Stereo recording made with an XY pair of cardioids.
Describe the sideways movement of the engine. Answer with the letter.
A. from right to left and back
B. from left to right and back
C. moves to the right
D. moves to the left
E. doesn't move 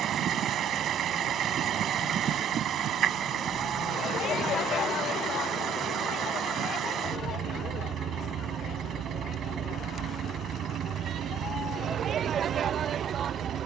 E.